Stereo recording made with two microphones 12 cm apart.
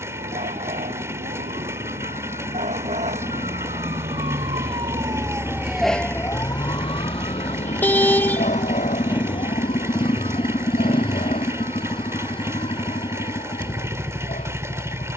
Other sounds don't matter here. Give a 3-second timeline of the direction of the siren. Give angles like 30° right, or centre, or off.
80° right, 40° right, 50° left, 80° left, 80° left.